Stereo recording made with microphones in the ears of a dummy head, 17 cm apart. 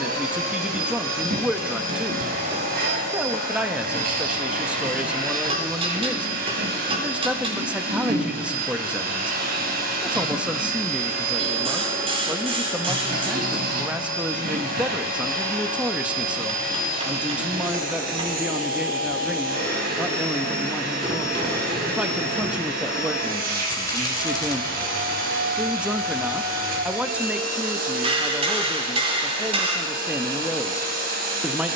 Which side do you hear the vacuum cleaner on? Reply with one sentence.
In this clip you hear the vacuum cleaner on the right.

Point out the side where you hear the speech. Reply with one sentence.
You can hear the speech in the centre.